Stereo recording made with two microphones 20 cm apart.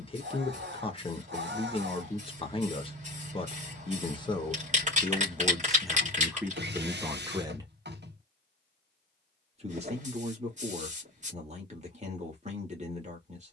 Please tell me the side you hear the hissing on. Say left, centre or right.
right.